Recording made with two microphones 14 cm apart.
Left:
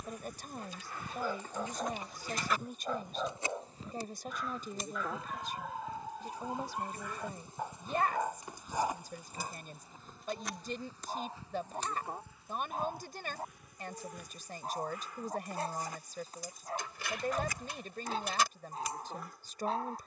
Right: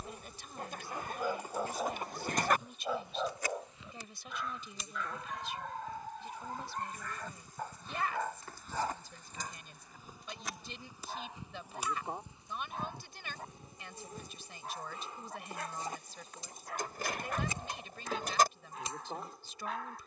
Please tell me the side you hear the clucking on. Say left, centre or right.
right.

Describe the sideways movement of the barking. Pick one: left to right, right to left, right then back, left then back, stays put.
right to left.